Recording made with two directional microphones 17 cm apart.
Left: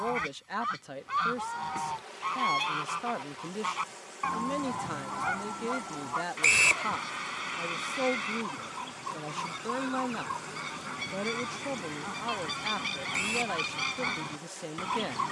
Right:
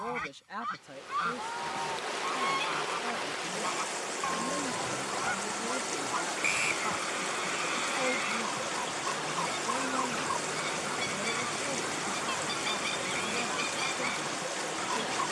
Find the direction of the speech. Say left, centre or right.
left.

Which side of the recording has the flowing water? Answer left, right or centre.
right.